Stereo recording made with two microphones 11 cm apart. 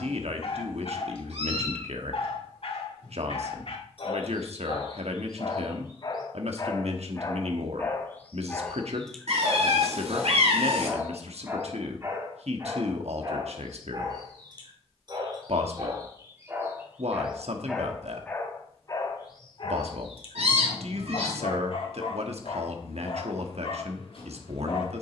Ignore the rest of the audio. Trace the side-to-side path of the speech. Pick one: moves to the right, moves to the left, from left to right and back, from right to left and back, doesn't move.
doesn't move.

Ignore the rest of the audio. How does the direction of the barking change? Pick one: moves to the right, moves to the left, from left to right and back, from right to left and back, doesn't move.
from left to right and back.